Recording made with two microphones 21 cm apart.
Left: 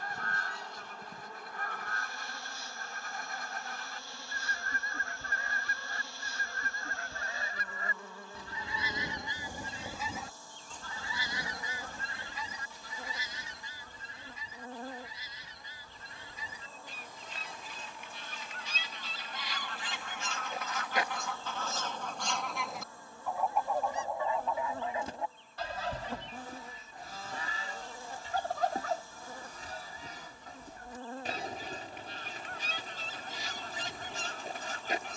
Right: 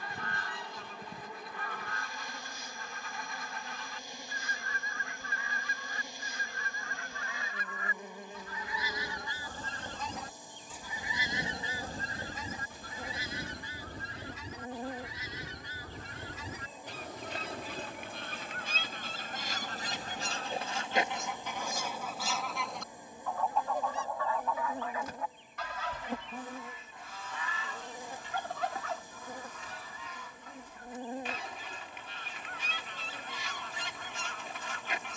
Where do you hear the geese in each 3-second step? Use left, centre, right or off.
left, left, left, centre, right, right, right, centre, left, left, left, left.